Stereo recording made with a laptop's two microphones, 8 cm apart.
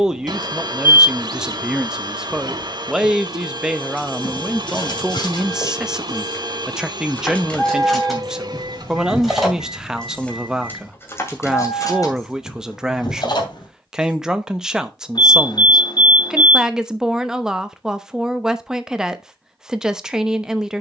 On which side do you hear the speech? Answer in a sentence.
You can hear the speech in the centre.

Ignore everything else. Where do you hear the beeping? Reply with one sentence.
In this clip you hear the beeping on the left.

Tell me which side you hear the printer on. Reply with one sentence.
You can hear the printer on the right.